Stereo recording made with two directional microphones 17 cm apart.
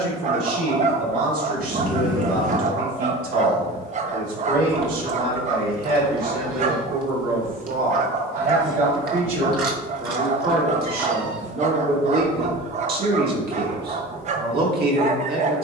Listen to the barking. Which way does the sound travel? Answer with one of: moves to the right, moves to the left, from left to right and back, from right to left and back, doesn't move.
doesn't move.